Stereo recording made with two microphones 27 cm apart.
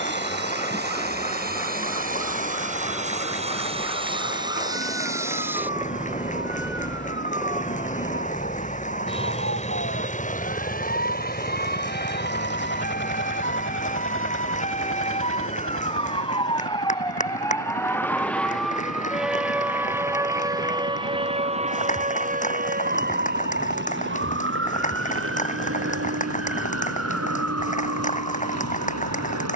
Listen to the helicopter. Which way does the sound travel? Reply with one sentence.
You can hear the helicopter travel towards the left.